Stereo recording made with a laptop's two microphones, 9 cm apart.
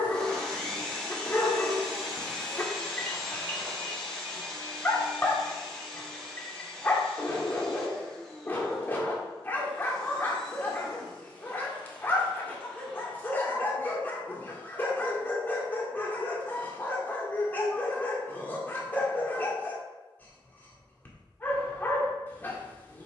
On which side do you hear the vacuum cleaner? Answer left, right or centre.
centre.